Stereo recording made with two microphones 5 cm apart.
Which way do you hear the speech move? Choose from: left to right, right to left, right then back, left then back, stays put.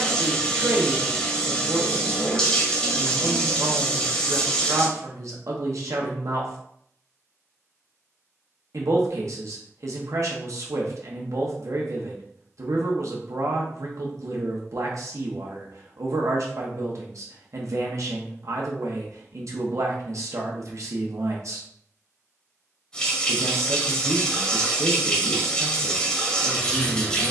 stays put.